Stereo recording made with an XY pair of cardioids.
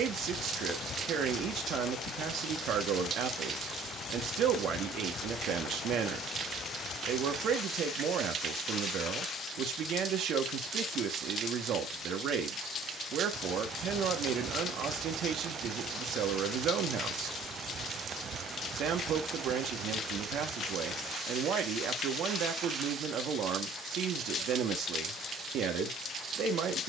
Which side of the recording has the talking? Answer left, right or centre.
right.